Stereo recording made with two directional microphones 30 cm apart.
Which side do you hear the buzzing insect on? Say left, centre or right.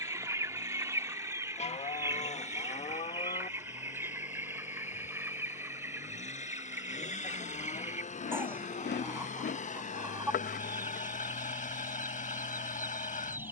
left.